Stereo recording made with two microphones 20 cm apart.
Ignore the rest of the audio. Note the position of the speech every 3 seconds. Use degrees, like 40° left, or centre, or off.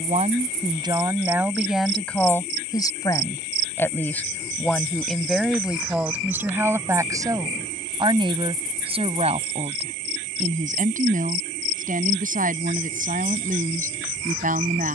10° right, centre, 20° right, 40° right, 40° right.